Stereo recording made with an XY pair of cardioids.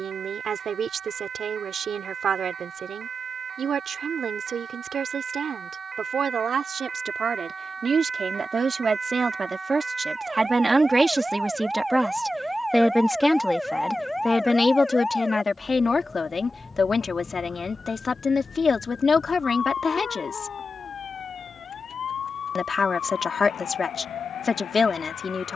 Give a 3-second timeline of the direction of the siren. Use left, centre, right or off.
right, right, right, right, centre, left, left, left, left.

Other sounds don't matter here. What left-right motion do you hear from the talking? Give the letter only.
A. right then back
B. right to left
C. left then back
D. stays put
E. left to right
B.